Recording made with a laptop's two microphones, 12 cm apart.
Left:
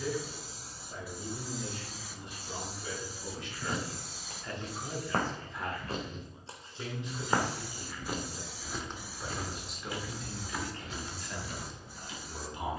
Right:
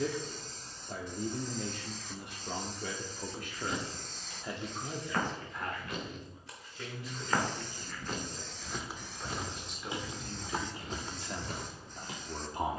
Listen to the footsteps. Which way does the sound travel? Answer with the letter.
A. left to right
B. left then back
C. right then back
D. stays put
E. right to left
A.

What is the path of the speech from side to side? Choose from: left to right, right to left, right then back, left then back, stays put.
left then back.